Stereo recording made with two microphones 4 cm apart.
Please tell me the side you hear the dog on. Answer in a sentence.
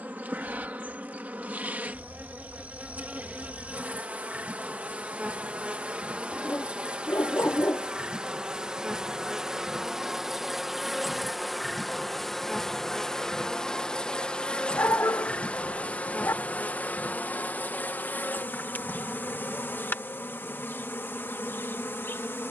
In this clip you hear the dog on the left.